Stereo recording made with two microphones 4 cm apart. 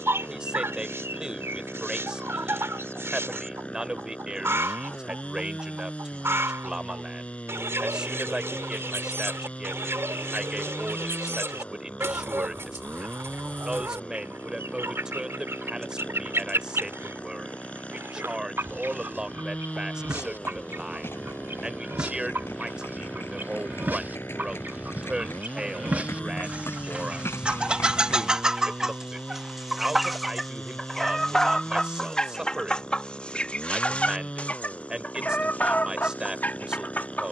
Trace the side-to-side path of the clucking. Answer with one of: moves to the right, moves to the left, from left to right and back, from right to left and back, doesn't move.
moves to the left.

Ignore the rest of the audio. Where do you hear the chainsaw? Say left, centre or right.
left.